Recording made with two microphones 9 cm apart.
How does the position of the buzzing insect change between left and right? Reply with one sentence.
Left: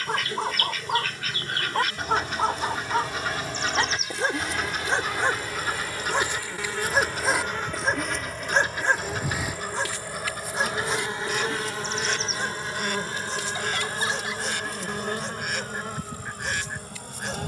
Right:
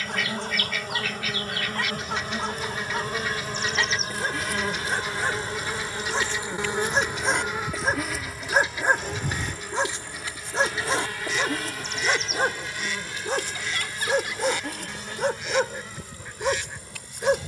In this clip you hear the buzzing insect travel towards the left.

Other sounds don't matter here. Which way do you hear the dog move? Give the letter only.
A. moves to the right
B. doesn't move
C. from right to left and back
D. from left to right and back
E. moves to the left
A.